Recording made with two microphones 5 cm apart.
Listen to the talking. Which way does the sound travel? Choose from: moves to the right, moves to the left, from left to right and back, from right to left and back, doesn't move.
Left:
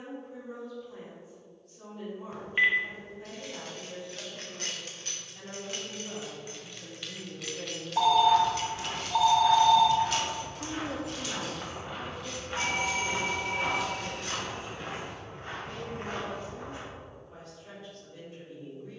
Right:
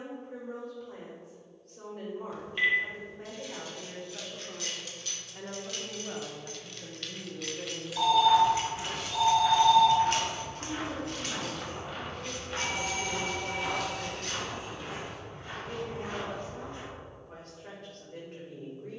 from right to left and back.